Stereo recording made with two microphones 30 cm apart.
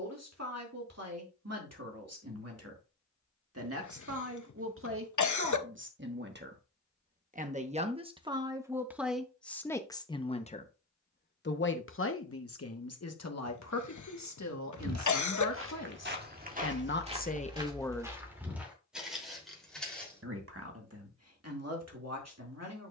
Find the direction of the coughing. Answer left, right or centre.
left.